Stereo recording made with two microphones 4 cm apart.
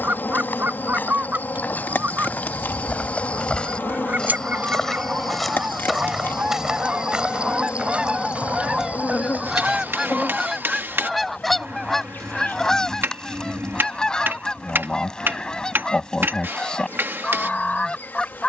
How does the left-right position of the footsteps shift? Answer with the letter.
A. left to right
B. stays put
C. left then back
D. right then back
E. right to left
A.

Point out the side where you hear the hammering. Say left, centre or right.
right.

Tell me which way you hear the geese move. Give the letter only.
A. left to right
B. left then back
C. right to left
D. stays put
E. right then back
C.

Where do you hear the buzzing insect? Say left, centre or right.
left.